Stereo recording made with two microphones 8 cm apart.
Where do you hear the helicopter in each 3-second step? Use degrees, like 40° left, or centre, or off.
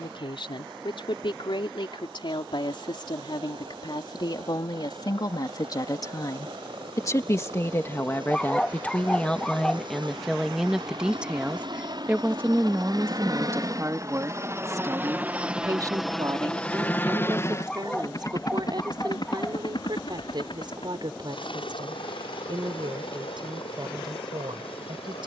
80° right, 80° right, 70° right, 60° right, 40° right, 10° left, 50° left, 70° left, 70° left.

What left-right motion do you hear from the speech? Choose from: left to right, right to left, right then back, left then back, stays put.
left to right.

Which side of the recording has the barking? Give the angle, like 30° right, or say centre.
10° left.